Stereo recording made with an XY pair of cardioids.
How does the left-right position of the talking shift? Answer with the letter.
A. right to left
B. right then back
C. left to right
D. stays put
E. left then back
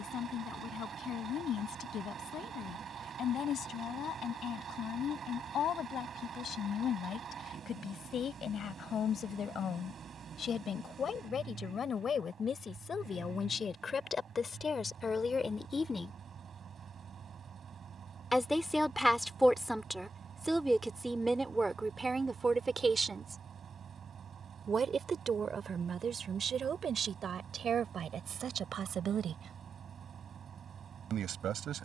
C.